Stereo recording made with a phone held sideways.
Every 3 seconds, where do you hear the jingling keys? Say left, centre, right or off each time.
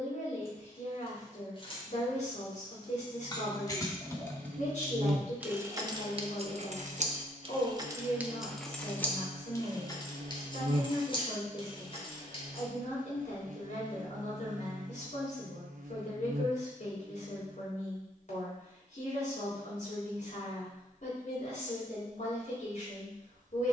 left, centre, right, left, left, off, off, off.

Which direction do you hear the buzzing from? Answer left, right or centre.
right.